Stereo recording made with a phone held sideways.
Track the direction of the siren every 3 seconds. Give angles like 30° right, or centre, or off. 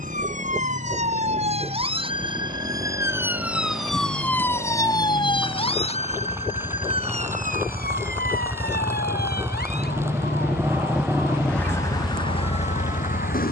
40° right, 10° left, 50° left, 70° left, 70° left.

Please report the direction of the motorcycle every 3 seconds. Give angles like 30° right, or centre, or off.
60° right, 50° right, 40° right, 10° right, 40° left.